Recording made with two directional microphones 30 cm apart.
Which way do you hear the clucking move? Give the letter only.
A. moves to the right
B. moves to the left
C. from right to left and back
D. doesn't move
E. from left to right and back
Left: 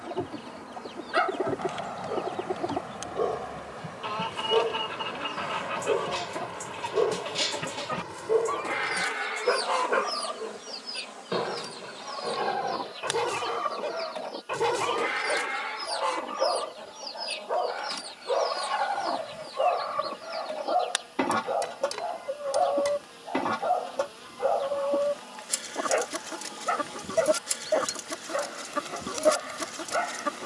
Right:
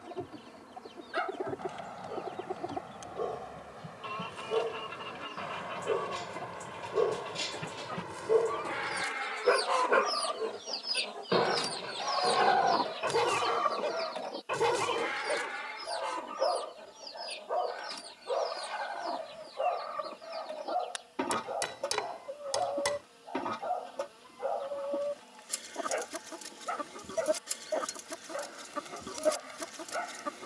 E.